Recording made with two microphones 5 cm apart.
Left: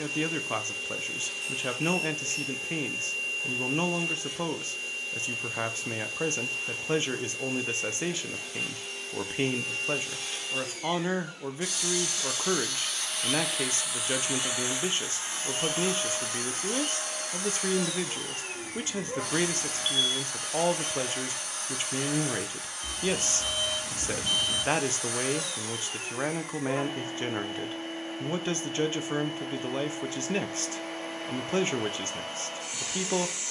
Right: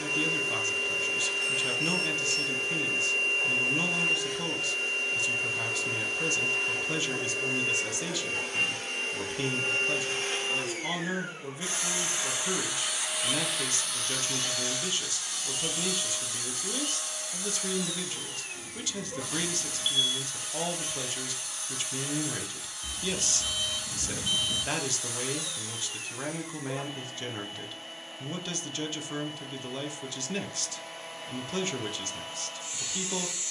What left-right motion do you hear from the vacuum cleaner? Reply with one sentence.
You can hear the vacuum cleaner travel towards the left.